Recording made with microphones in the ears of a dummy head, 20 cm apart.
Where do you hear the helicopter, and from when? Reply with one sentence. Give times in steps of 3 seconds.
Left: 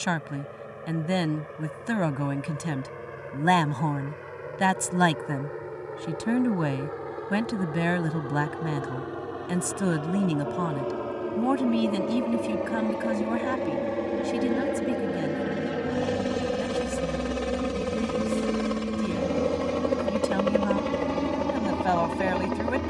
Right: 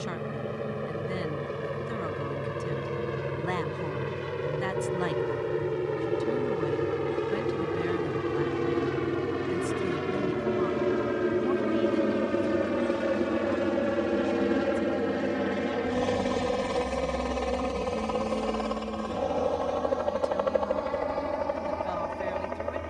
In this clip you hear the helicopter on the right from 0 s, in the centre from 12 s and on the left from 18 s.